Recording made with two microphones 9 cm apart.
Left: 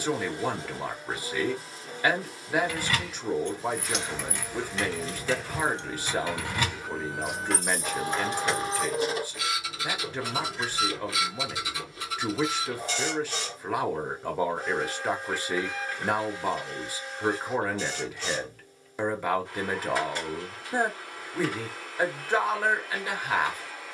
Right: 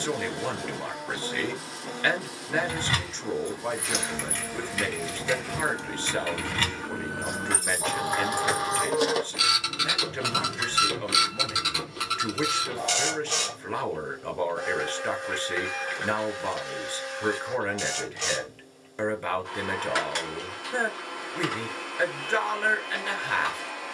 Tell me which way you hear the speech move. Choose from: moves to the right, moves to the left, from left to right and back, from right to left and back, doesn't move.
doesn't move.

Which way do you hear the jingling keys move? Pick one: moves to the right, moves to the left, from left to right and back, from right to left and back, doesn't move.
from right to left and back.